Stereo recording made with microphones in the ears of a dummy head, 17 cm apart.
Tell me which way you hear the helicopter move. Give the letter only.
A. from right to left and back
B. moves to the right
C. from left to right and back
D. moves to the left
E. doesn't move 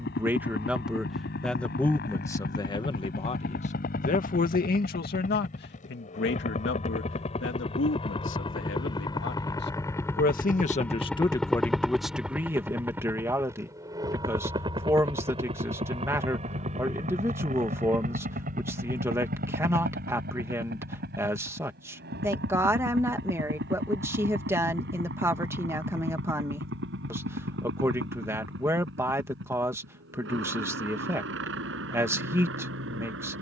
B.